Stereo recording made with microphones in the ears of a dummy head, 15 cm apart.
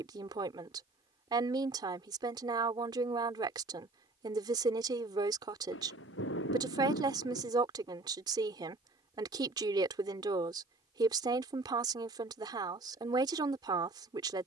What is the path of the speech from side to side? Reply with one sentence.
You can hear the speech stay put.